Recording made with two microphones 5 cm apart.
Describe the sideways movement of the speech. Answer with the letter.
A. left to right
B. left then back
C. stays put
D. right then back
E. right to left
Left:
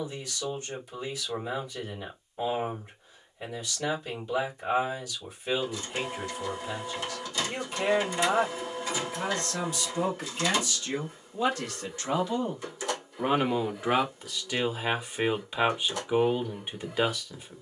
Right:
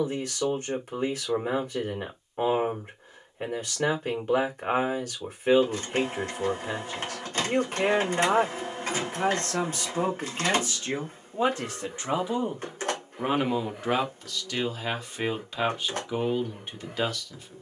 E.